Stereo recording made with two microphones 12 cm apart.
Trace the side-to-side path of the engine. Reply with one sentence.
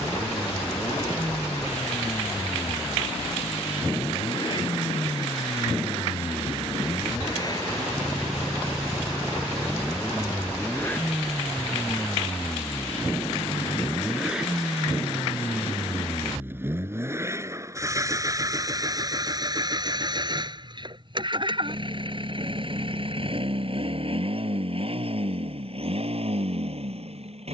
In this clip you hear the engine go from the left side to the right.